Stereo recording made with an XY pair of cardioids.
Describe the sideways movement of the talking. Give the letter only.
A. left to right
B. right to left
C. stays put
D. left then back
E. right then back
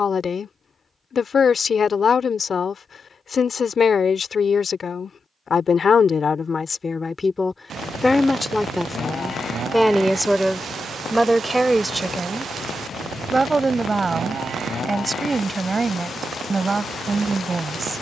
A.